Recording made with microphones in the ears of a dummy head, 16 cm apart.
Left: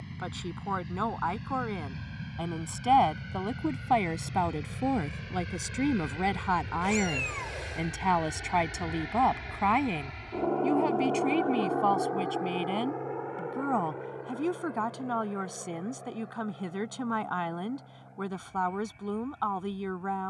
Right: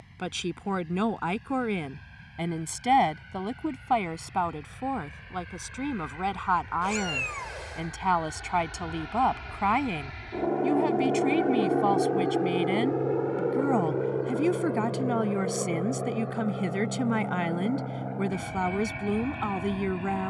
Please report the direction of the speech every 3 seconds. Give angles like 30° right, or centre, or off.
20° right, 10° left, 10° left, centre, 20° right, 20° right, 20° right.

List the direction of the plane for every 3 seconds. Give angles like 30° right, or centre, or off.
70° left, 60° left, 30° left, 10° right, 40° right, 60° right, 70° right.